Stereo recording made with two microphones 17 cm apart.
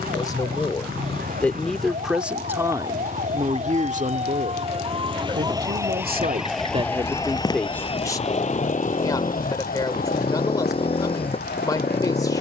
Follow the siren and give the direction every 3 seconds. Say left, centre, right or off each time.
right, right, left, left.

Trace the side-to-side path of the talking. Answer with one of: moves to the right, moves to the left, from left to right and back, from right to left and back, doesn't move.
from left to right and back.